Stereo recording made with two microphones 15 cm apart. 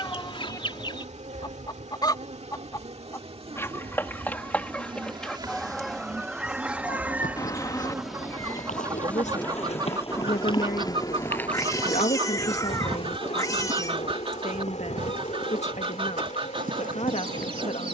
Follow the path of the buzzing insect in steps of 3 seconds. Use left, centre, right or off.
right, right, centre, left, left, left.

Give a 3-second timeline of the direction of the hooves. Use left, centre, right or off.
off, off, left, left, right, right.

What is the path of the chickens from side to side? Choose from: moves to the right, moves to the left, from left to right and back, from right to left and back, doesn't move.
moves to the right.